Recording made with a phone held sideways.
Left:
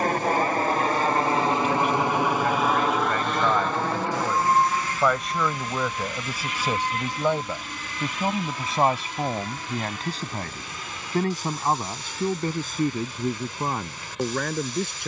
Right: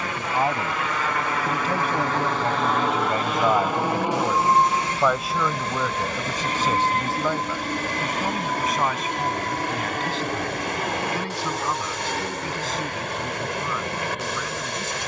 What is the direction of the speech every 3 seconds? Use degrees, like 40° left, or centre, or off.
40° right, 10° right, 20° left, 40° left, 50° left.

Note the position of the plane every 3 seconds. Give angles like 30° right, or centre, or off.
20° left, 20° right, 40° right, 50° right, 60° right.